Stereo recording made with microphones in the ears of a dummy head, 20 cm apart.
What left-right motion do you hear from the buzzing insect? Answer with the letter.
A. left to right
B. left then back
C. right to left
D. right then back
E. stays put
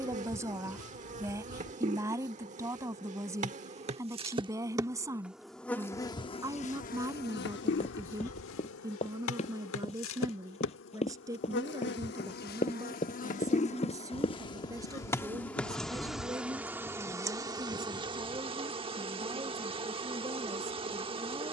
B.